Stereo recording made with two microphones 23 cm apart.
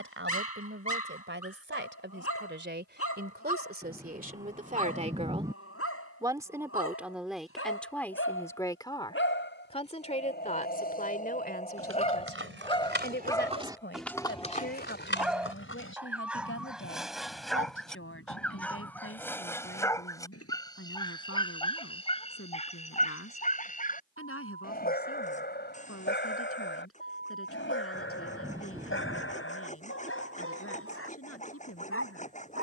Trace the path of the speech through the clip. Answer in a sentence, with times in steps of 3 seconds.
You can hear the speech on the right from 0 s, in the centre from 6 s and on the left from 9 s.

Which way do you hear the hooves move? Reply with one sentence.
You can hear the hooves go from the right side to the left.